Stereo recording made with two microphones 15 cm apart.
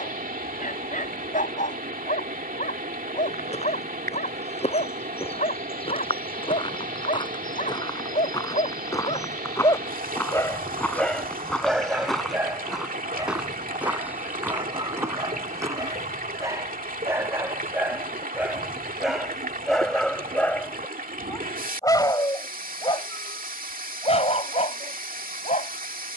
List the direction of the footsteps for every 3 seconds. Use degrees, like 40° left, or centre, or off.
off, 50° left, 30° left, 10° left, 10° right, 20° right, off, off, off.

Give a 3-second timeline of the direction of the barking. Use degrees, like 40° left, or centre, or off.
60° left, 60° left, 60° left, 10° left, 20° right, 20° right, centre, 30° left, 50° left.